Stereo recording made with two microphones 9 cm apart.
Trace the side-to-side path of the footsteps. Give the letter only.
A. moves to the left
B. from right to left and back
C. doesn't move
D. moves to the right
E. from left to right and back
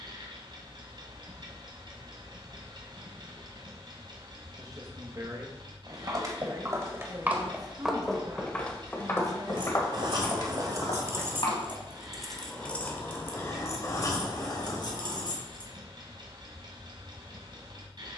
A.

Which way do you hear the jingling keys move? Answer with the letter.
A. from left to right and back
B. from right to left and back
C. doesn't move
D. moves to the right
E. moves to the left
E.